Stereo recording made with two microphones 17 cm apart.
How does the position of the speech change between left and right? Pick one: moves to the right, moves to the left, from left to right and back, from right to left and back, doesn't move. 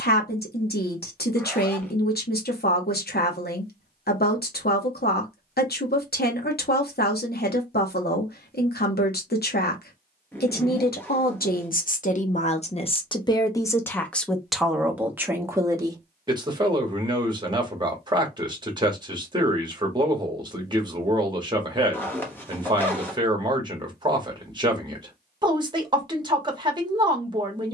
moves to the right.